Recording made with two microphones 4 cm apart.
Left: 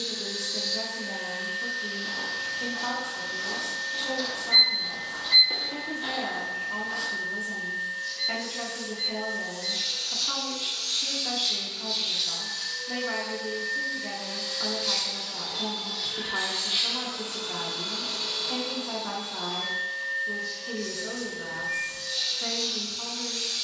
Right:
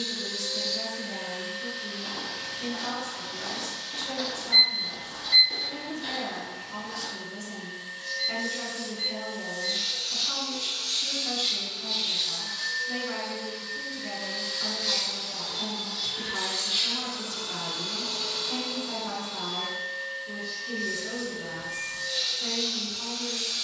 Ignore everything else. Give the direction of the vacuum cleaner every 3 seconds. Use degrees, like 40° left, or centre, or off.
50° right, 50° right, 50° right, 50° right, 20° right, 20° left, 10° right, 40° right.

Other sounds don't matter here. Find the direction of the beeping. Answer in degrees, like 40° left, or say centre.
70° left.